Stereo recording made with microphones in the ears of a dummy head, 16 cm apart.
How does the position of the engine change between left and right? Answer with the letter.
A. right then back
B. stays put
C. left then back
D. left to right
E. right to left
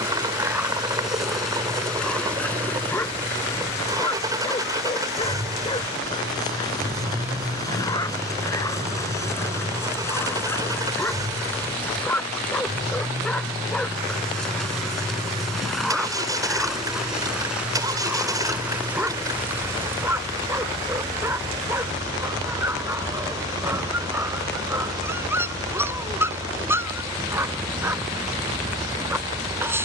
B.